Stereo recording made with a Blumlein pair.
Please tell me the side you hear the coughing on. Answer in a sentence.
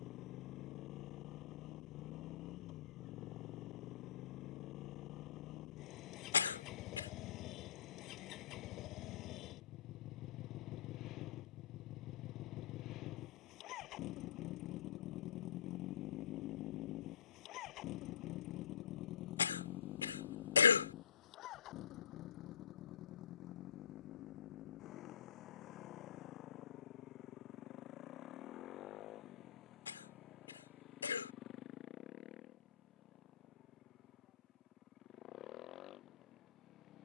In this clip you hear the coughing on the left.